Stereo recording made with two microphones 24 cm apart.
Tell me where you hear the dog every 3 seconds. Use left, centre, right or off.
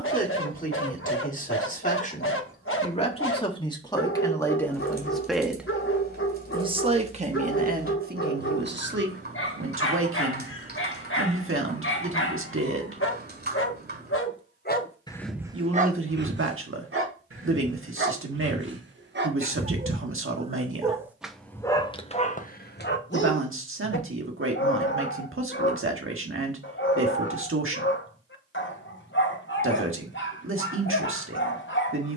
left, left, left, left, left, right, right, left, left, left, left.